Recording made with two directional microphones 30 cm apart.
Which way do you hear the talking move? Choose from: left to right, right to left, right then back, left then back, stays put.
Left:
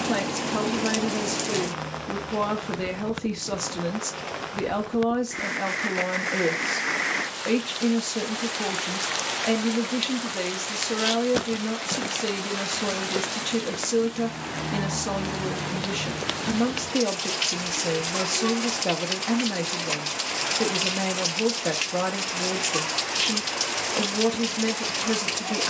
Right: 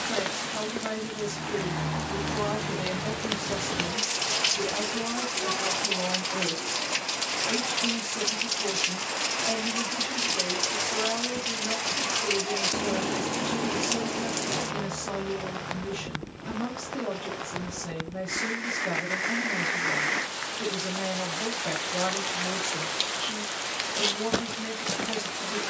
stays put.